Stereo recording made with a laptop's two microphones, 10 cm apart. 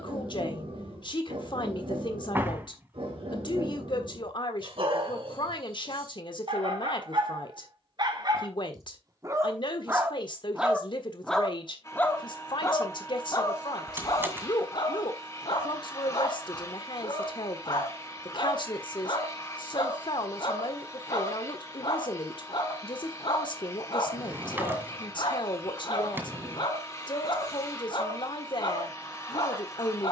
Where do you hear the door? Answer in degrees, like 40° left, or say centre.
20° right.